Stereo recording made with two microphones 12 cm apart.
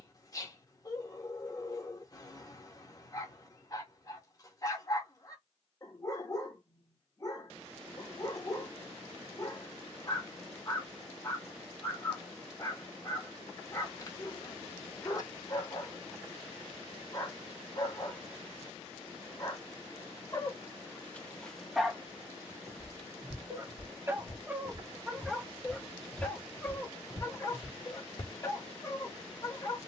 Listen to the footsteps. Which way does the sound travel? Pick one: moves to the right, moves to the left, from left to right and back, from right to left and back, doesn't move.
moves to the left.